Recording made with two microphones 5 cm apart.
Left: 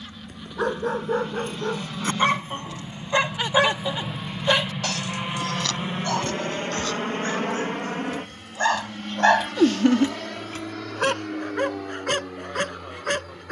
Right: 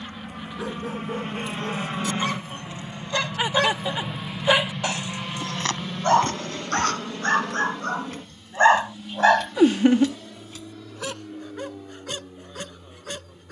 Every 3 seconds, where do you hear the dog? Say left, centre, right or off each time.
left, centre, right, left, left.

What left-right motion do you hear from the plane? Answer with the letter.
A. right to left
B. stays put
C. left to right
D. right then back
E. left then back
A.